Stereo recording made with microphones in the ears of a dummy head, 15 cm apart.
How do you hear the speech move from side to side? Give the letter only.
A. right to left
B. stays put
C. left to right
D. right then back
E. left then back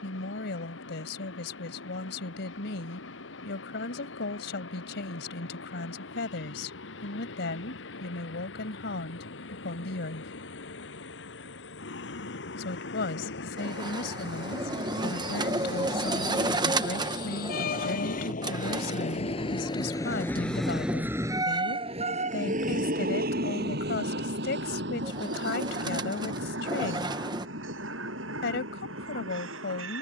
B.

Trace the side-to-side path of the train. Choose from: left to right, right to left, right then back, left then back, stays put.
left to right.